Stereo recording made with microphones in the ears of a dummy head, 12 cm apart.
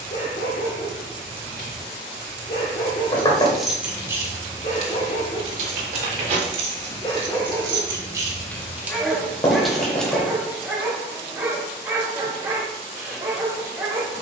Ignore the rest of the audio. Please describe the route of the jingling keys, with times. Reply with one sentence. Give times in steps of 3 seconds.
In this clip you hear the jingling keys not at all from 0 s, on the right from 3 s, in the centre from 9 s and not at all from 12 s.